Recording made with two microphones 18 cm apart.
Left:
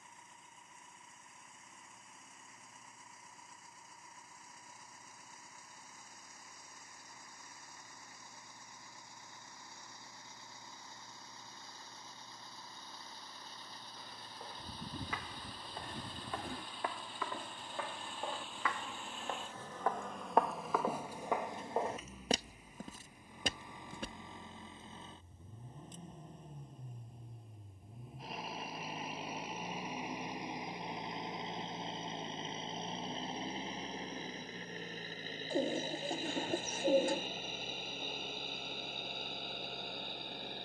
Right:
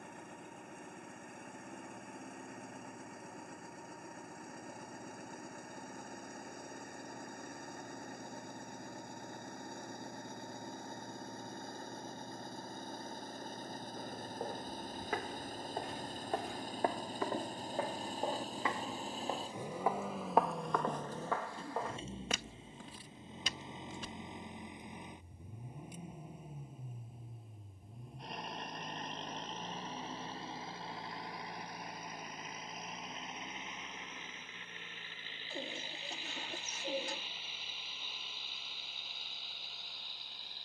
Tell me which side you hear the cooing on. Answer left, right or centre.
left.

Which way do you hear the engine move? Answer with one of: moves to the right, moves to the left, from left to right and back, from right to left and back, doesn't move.
moves to the left.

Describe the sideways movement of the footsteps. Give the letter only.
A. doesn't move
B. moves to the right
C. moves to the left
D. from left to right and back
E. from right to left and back
C.